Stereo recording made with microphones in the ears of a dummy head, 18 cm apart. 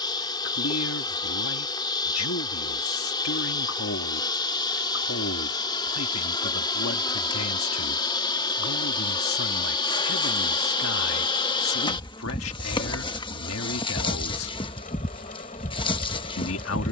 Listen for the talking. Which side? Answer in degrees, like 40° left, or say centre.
80° left.